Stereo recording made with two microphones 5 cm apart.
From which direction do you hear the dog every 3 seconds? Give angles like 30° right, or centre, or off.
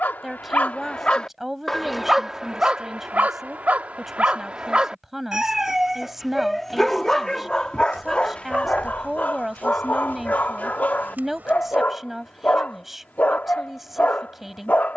10° left, 20° right, 10° left, 30° left, 30° left.